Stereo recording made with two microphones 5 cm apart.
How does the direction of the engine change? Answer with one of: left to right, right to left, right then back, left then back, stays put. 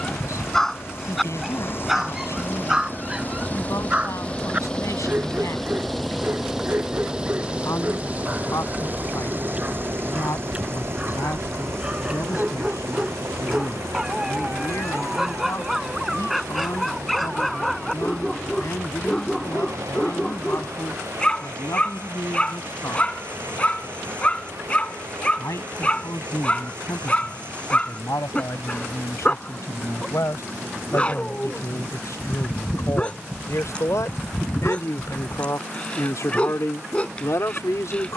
left to right.